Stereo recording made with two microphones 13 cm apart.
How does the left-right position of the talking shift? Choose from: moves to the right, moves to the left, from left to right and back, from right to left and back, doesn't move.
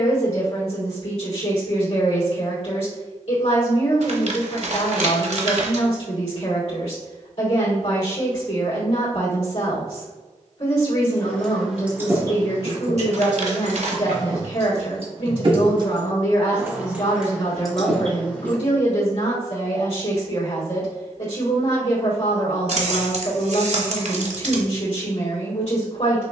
doesn't move.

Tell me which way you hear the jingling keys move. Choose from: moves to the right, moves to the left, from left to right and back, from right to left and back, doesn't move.
from left to right and back.